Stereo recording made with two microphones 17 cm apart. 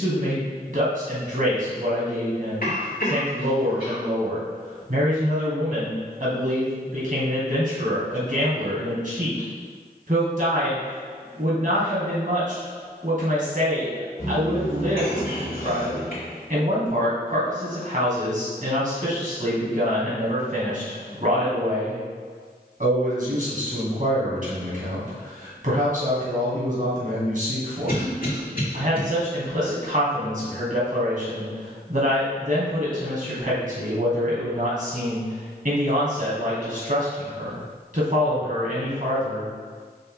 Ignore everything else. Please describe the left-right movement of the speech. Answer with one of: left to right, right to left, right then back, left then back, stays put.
stays put.